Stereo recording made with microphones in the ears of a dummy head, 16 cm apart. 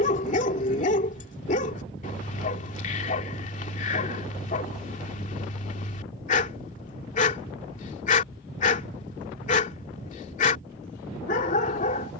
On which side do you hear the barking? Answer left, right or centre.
left.